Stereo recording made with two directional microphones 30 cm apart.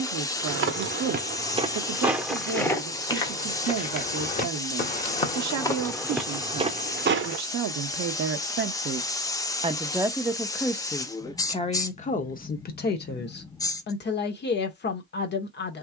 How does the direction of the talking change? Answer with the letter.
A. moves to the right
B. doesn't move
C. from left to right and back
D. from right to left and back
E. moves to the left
E.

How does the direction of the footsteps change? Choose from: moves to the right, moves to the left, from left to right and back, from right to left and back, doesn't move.
from right to left and back.